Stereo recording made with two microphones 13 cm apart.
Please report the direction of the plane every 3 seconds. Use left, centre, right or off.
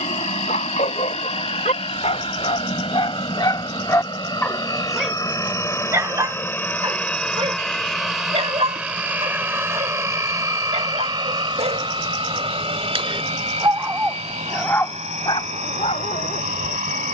left, left, centre, right, right, right.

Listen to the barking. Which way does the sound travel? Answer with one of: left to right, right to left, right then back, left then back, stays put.
right then back.